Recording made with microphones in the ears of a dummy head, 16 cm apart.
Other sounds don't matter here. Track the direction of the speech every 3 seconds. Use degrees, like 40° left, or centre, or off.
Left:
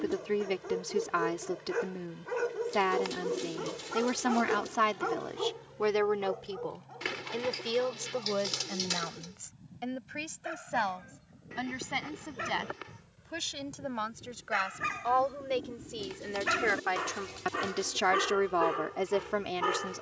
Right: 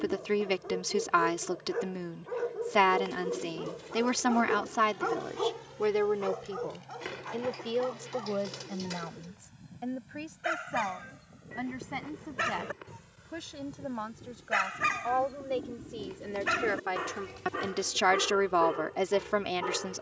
20° right, centre, 50° left, 60° left, 60° left, 30° left, 10° right.